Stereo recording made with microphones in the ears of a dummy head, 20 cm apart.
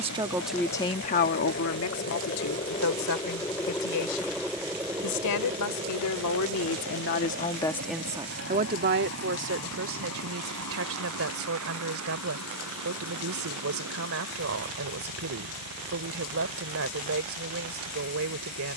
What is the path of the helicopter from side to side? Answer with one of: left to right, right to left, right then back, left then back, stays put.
left to right.